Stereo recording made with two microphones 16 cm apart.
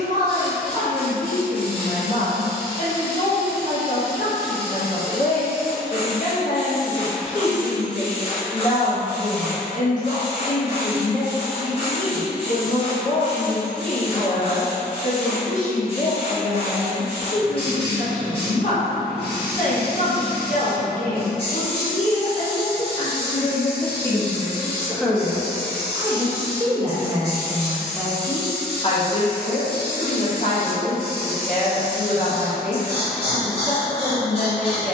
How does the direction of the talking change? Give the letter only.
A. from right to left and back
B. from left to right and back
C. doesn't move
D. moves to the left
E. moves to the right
B.